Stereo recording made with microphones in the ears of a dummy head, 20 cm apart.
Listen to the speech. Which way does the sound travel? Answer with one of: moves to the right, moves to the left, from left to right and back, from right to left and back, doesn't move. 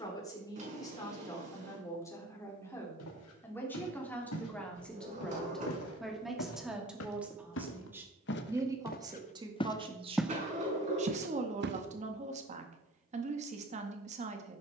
moves to the right.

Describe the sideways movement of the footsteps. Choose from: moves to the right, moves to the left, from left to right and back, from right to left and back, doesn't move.
moves to the right.